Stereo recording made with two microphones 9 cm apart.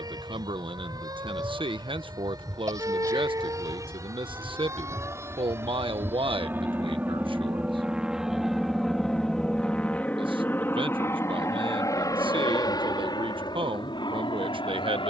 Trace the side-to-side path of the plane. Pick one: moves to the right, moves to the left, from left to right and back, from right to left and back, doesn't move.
moves to the left.